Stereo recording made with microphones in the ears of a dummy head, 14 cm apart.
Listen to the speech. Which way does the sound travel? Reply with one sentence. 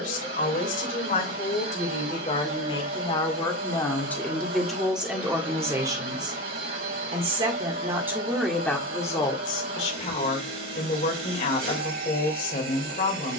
You can hear the speech move from left to right and back again.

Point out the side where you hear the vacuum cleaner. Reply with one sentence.
You can hear the vacuum cleaner on the right.